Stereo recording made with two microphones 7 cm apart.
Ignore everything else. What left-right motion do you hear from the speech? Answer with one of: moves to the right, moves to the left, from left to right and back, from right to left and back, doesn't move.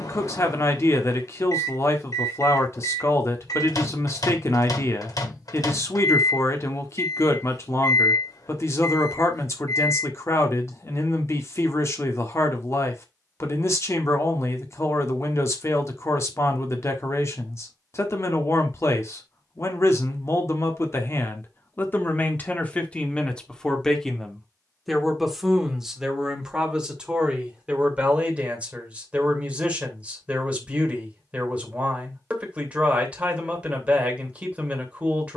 moves to the right.